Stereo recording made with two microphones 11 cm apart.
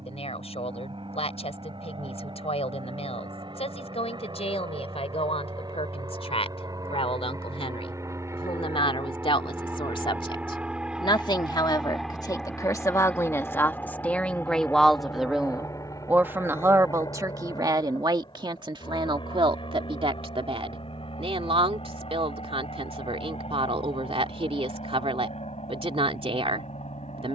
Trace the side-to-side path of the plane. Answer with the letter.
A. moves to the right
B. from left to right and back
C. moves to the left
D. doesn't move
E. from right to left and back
C.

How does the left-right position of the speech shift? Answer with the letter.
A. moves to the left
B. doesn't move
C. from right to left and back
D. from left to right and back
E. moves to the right
E.